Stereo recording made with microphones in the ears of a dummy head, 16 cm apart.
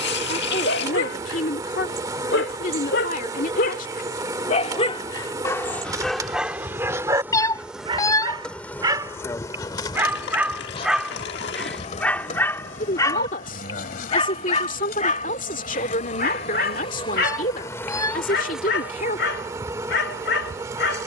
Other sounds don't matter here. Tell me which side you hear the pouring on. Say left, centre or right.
left.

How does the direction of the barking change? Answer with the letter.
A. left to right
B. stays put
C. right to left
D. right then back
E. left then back
D.